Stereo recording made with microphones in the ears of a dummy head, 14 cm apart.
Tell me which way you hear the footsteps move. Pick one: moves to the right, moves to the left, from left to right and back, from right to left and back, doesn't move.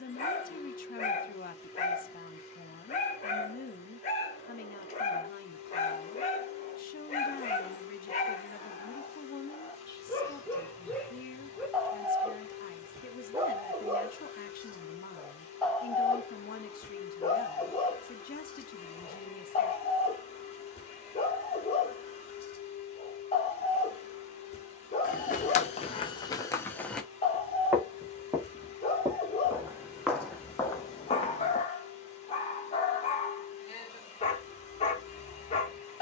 from left to right and back.